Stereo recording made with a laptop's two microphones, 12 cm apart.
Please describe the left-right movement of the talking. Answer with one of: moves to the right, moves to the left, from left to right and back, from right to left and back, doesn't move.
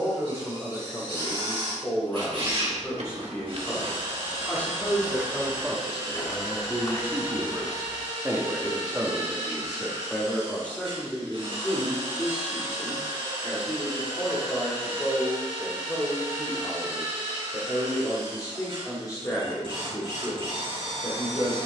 from left to right and back.